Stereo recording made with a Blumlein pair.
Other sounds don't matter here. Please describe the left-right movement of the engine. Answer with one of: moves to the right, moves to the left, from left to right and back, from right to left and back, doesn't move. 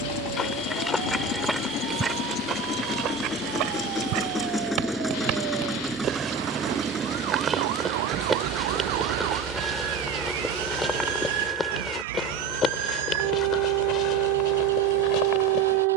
moves to the right.